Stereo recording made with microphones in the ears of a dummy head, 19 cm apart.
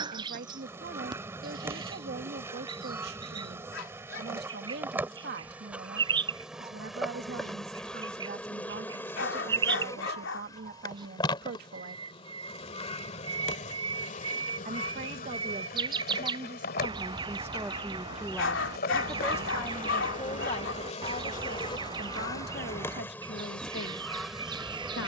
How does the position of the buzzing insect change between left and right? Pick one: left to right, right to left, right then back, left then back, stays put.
left then back.